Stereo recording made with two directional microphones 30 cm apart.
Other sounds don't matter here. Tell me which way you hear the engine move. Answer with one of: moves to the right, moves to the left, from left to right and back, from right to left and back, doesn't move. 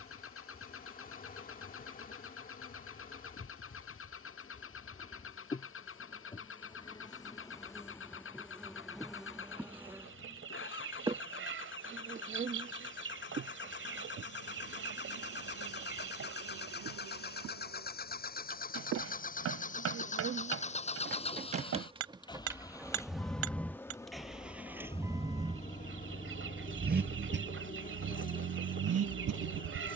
moves to the right.